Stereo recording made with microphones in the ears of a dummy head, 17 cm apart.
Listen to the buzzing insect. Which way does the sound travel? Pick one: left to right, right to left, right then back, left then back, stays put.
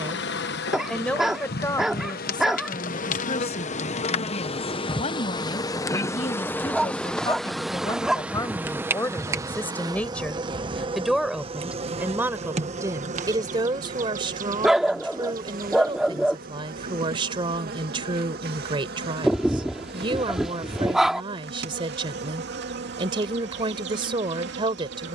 left to right.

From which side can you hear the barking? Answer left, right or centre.
centre.